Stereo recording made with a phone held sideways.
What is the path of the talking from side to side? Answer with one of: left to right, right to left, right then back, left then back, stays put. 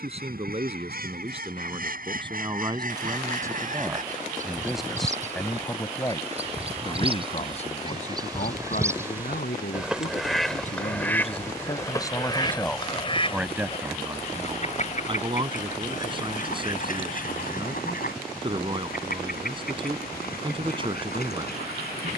left then back.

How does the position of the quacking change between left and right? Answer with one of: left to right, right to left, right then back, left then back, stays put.
right to left.